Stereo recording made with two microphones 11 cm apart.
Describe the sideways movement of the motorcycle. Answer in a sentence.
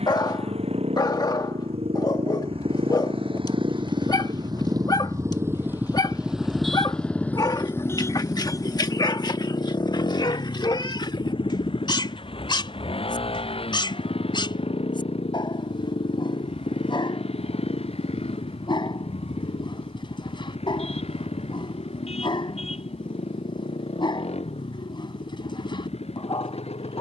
In this clip you hear the motorcycle go from the right side to the left.